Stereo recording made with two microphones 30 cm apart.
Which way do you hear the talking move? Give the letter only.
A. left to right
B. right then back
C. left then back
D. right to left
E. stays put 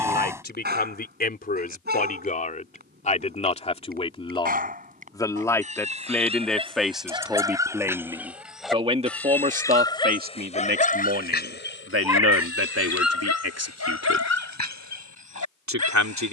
A.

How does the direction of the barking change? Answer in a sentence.
In this clip you hear the barking go from the right side to the left.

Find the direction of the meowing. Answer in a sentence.
You can hear the meowing in the centre.